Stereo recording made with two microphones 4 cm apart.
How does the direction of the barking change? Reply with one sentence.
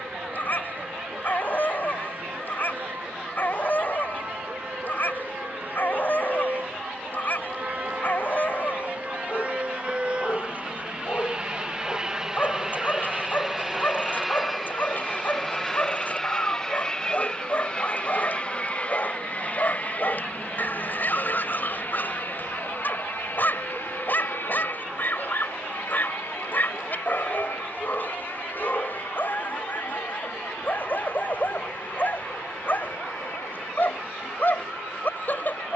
In this clip you hear the barking stay in one place.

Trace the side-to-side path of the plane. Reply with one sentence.
You can hear the plane go from the right side to the left.